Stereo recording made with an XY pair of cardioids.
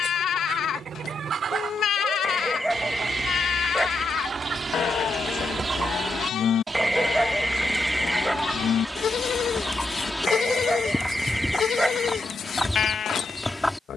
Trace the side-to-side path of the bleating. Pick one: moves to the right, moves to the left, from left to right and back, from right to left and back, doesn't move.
doesn't move.